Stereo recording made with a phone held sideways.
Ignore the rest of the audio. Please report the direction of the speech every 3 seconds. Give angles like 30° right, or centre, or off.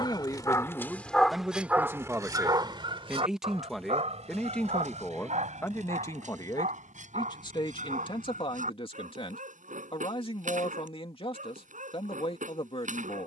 centre, 10° left, 40° left, 40° left, 40° left.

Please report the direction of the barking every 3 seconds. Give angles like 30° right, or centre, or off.
centre, 60° right, 70° right, 70° right, 70° right.